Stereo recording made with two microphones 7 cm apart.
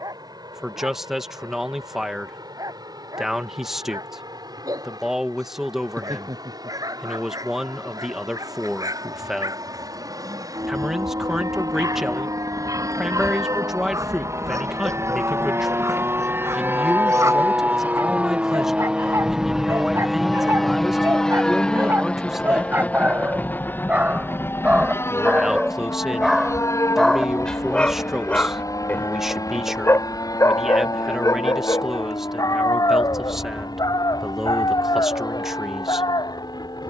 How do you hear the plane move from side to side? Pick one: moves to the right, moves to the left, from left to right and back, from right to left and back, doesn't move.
moves to the left.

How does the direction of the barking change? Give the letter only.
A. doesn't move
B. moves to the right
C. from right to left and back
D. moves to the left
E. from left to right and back
D.